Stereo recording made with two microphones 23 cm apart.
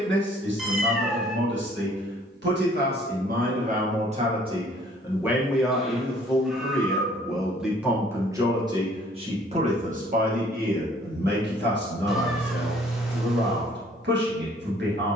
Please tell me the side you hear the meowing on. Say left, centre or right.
centre.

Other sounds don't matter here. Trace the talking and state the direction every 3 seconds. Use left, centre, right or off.
right, right, centre, right, right.